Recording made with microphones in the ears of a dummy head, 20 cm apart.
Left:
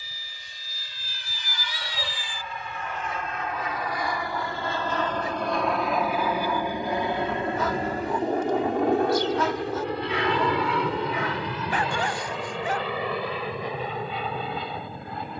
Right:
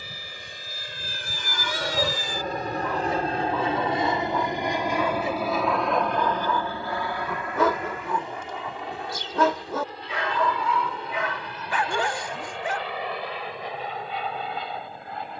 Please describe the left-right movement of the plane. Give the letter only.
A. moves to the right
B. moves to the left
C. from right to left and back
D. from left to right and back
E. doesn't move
B.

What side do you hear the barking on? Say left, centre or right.
right.